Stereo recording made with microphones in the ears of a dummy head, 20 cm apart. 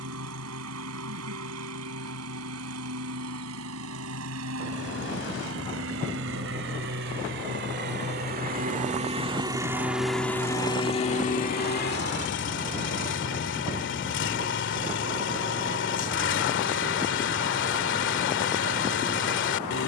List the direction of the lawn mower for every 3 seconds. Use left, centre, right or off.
right, right, right, centre, left, left, left.